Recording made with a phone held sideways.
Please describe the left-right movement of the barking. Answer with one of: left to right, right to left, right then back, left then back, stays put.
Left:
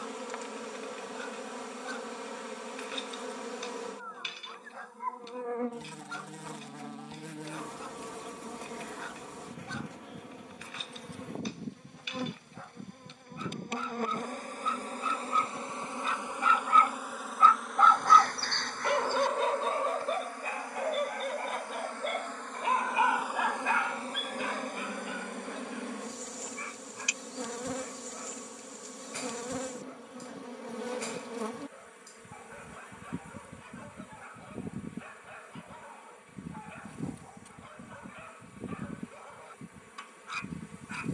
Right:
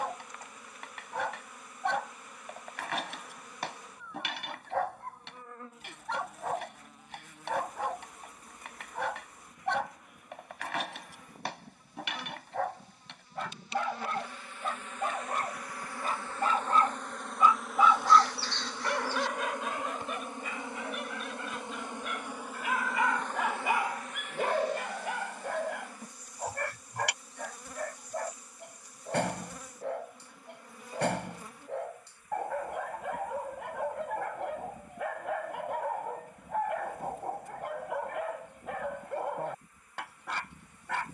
left then back.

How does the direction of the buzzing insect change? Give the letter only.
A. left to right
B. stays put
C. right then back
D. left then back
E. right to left
C.